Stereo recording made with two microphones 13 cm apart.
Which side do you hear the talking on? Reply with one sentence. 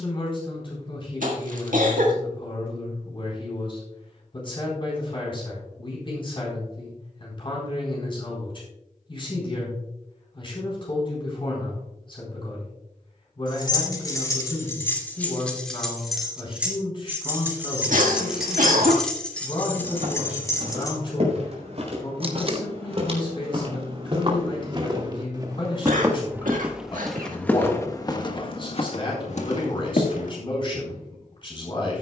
In this clip you hear the talking on the left.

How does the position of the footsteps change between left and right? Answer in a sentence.
You can hear the footsteps move from right to left.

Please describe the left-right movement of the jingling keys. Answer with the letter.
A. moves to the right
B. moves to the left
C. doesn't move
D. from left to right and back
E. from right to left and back
D.